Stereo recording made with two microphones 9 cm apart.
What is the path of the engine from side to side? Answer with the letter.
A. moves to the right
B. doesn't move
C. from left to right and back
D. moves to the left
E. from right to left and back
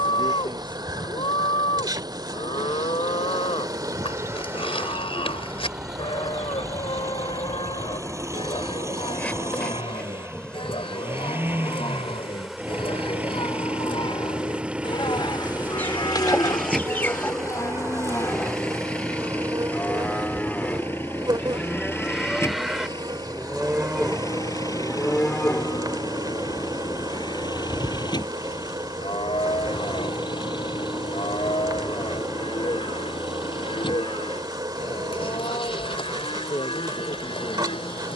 D.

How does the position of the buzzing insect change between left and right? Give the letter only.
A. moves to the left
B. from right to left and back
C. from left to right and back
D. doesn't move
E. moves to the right
B.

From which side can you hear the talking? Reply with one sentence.
You can hear the talking on the left.